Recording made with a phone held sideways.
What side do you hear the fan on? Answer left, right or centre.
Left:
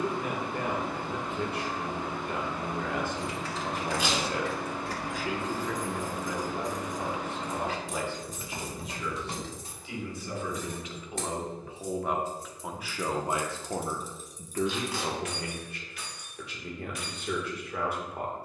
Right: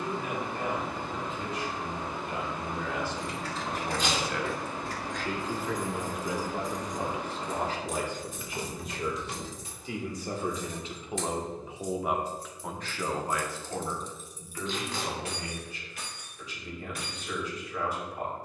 left.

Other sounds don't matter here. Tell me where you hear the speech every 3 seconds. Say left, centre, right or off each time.
left, left, right, right, left, left.